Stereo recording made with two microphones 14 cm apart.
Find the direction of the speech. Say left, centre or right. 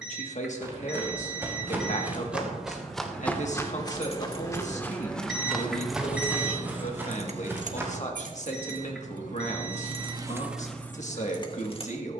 left.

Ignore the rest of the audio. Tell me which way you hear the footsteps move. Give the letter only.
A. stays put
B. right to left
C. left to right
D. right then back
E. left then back
E.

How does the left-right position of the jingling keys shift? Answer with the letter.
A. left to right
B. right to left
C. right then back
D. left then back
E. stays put
C.